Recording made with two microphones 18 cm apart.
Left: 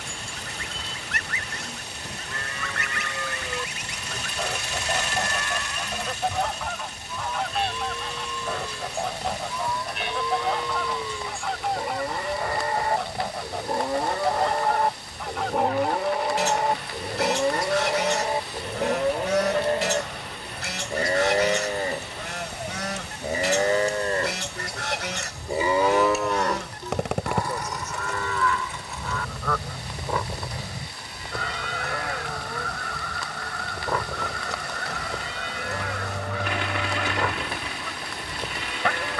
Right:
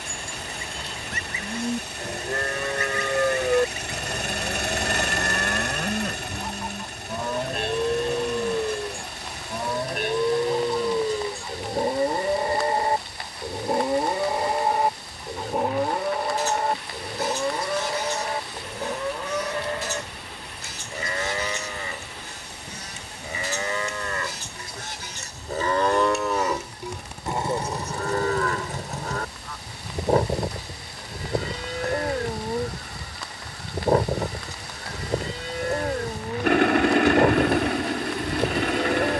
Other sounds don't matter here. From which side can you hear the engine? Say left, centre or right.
right.